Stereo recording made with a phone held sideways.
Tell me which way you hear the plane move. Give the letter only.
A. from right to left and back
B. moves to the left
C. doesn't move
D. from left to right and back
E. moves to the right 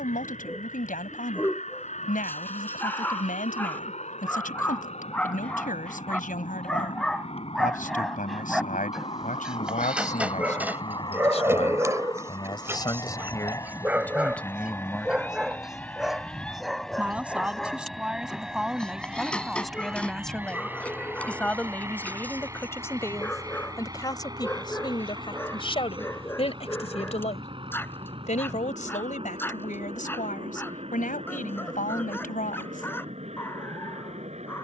E.